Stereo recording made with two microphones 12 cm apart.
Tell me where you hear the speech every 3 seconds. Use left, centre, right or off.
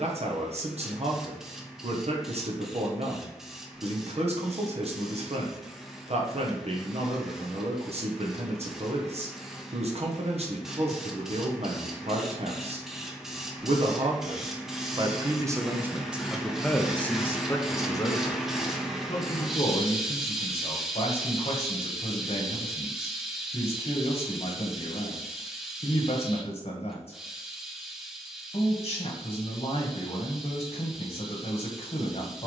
right, right, right, right, right, centre, left, left, left, left, left.